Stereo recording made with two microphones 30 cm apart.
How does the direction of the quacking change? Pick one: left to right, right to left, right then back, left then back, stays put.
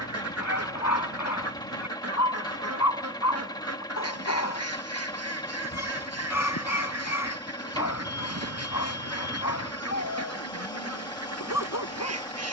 stays put.